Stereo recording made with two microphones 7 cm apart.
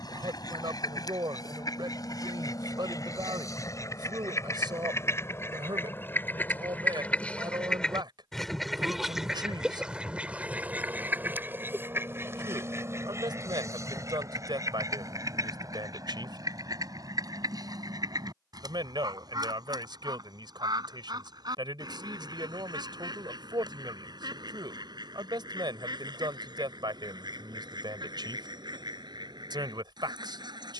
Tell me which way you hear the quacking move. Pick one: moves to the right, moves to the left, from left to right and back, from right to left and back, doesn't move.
moves to the right.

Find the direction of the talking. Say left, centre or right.
right.